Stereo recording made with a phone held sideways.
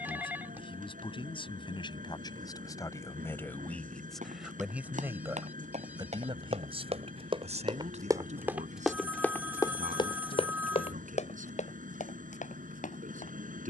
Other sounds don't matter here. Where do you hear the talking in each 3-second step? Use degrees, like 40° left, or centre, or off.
40° left, centre, 50° right, 70° right, 70° right.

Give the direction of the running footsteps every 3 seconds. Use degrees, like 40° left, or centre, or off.
off, 60° right, 30° right, 40° left, 70° left.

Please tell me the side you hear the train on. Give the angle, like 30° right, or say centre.
70° right.